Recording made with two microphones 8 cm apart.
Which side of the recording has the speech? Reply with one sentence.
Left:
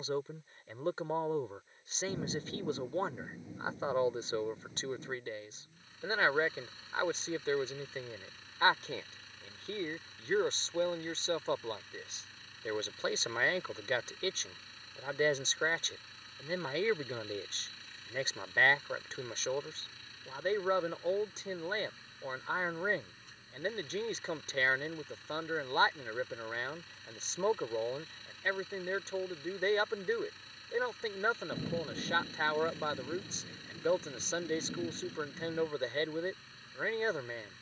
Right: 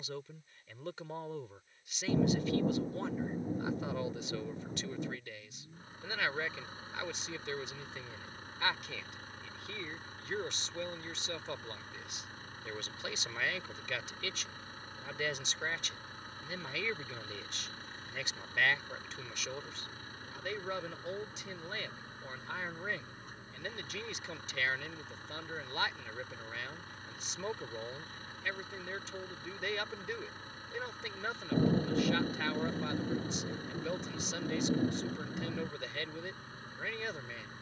In this clip you hear the speech on the left.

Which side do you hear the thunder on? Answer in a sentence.
You can hear the thunder on the right.